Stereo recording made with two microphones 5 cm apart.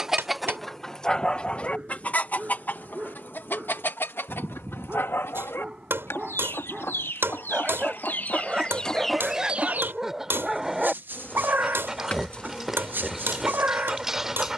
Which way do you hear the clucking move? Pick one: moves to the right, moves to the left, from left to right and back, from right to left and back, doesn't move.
from right to left and back.